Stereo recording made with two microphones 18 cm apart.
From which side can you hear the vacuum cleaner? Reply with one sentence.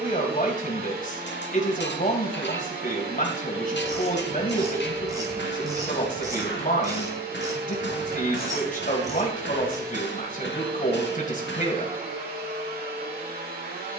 In this clip you hear the vacuum cleaner on the right.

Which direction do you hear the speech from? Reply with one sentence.
In this clip you hear the speech on the left.